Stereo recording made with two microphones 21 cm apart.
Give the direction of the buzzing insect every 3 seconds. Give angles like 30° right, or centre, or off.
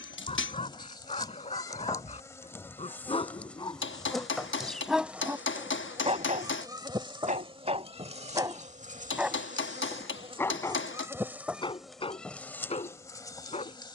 20° left, centre, 30° right, 20° right, 10° left.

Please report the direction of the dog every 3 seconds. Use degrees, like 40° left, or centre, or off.
30° left, 10° left, 30° right, 10° left, 30° left.